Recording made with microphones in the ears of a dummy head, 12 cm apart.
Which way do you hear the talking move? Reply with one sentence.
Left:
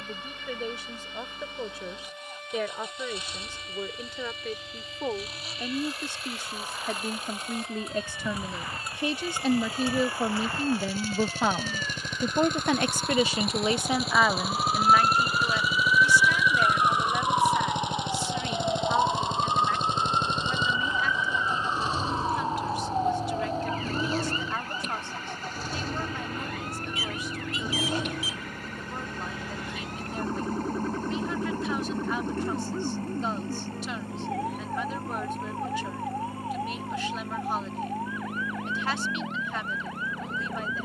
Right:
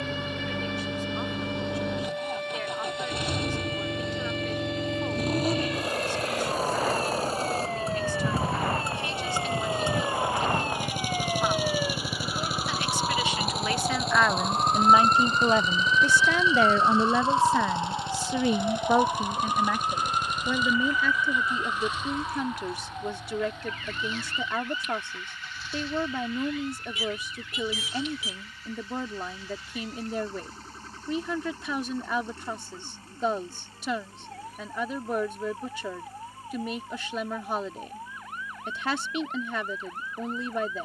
You can hear the talking travel towards the right.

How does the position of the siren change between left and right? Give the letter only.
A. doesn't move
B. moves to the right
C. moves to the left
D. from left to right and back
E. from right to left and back
C.